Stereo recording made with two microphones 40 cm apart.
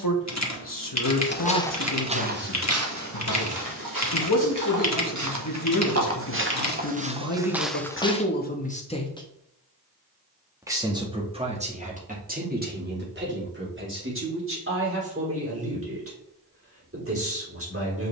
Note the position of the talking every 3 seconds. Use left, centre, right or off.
left, left, left, centre, right, right.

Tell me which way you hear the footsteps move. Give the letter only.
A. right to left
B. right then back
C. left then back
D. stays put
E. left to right
B.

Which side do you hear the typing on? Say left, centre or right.
left.